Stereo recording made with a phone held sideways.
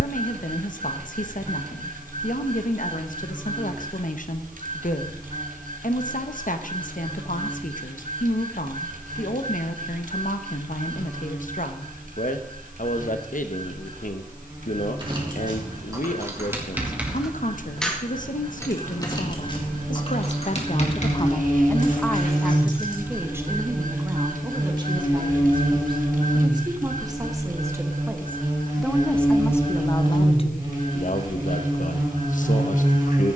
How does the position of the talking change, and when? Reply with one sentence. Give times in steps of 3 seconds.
You can hear the talking on the left from 0 s, in the centre from 21 s, on the right from 24 s, in the centre from 27 s and on the left from 30 s.